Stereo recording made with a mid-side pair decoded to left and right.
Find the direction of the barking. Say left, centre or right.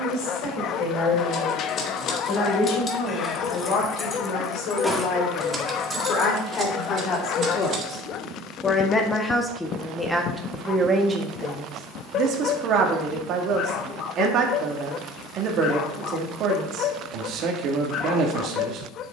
left.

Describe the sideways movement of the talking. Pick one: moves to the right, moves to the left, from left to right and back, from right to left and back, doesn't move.
moves to the right.